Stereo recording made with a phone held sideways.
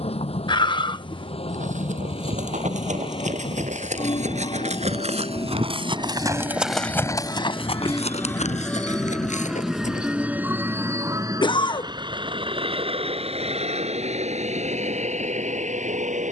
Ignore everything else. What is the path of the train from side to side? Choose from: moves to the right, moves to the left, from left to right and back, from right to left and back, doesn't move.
moves to the right.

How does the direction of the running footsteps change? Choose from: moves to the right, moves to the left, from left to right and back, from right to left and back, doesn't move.
moves to the left.